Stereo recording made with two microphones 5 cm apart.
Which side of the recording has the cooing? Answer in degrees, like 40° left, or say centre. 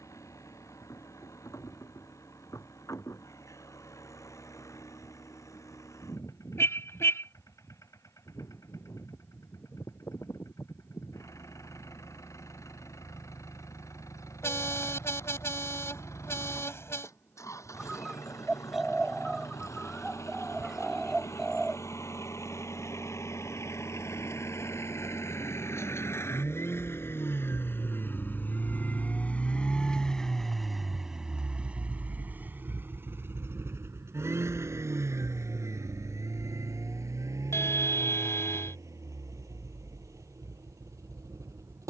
centre.